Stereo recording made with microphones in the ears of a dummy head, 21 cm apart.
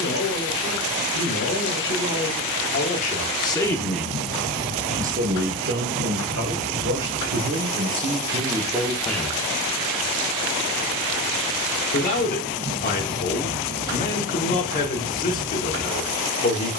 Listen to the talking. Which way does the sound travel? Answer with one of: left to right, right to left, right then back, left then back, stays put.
right then back.